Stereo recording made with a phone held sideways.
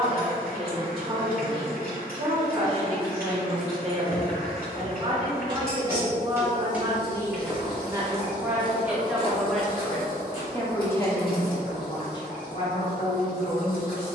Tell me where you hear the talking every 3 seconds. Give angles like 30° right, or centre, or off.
40° right, 40° right, 20° right, 10° left, 40° left.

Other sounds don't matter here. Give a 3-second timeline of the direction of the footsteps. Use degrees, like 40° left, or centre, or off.
off, 30° right, 10° left, 50° left, off.